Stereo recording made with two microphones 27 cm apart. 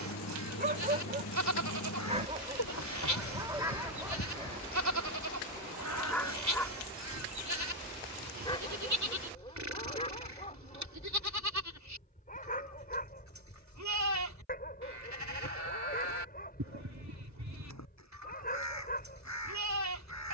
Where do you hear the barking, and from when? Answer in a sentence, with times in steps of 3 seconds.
You can hear the barking on the right from 0 s, in the centre from 3 s and on the left from 9 s.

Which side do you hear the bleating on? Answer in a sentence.
In this clip you hear the bleating on the right.